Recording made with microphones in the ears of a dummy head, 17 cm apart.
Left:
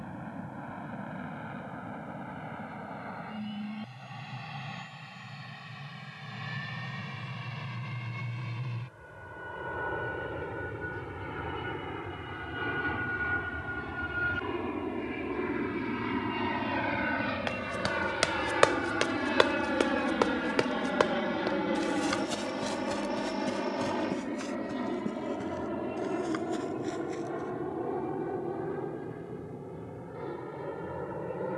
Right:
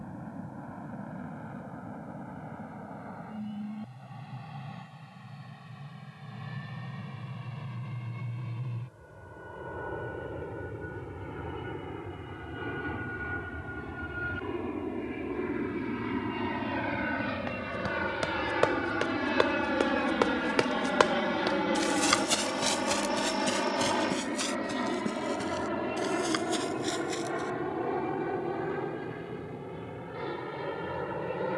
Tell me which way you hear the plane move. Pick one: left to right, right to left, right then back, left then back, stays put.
left to right.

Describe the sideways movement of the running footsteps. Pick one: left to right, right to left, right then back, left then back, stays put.
left to right.